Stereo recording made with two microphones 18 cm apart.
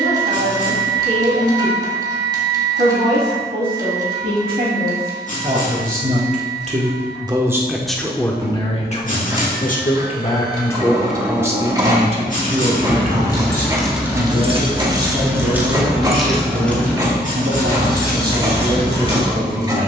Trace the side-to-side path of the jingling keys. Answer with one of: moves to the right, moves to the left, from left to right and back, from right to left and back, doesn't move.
from left to right and back.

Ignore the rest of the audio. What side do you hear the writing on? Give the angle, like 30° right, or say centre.
50° left.